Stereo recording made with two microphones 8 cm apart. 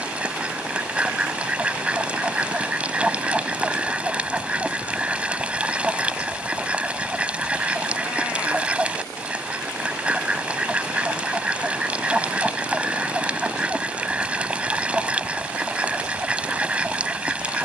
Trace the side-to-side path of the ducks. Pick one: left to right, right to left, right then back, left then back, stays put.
stays put.